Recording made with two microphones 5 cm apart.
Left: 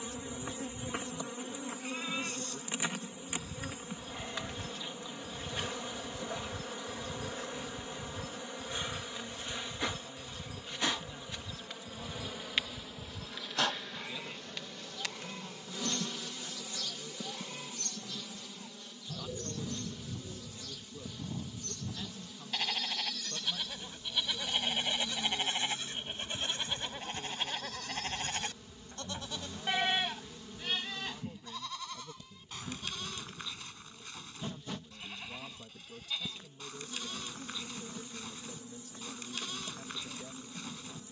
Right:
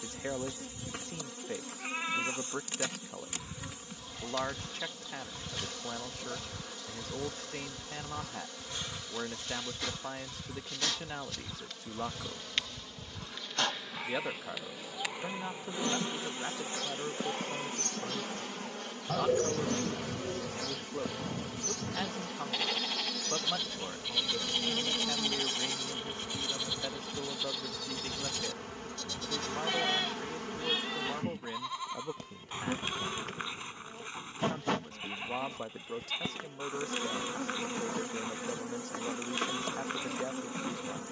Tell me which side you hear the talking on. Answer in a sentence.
In this clip you hear the talking on the right.